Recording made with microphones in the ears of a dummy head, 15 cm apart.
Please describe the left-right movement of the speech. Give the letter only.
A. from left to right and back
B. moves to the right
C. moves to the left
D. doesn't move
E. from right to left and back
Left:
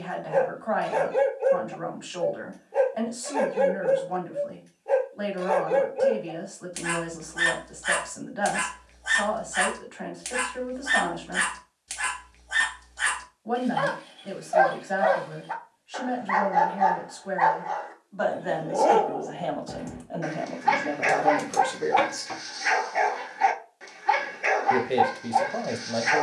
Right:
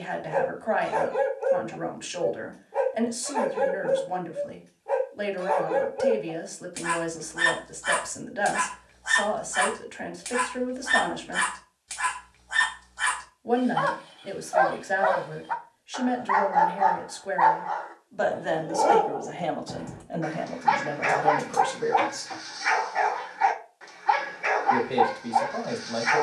C.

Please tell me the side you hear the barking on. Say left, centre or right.
left.